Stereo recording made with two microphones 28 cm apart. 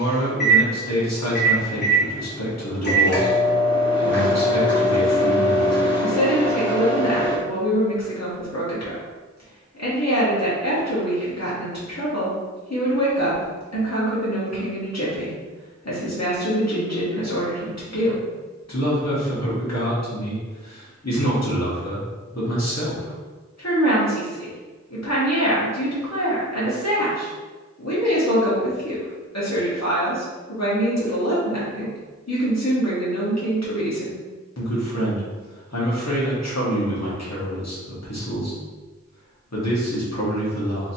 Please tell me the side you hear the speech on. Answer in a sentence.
You can hear the speech on the left.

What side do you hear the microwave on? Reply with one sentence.
You can hear the microwave on the left.